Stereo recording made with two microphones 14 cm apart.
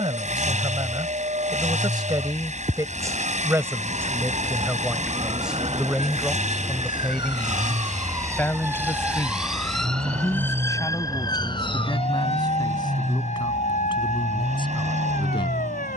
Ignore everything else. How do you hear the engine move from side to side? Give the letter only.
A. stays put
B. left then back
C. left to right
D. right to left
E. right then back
A.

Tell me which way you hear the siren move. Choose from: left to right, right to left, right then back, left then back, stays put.
right to left.